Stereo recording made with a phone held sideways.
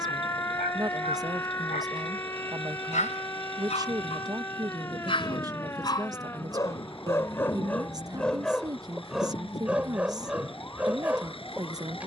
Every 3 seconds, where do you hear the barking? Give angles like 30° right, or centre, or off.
60° left, 40° left, 10° left, 10° right.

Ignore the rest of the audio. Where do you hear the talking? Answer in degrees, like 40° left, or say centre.
20° right.